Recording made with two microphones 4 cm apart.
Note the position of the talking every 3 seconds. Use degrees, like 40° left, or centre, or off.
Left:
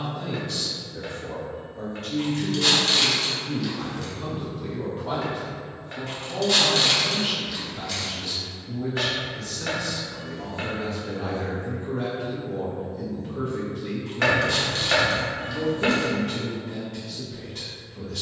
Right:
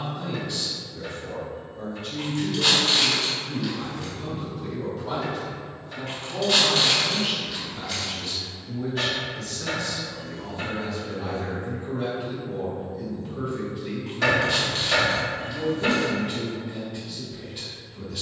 70° left, 30° left, centre, 20° left, 70° left, 70° left.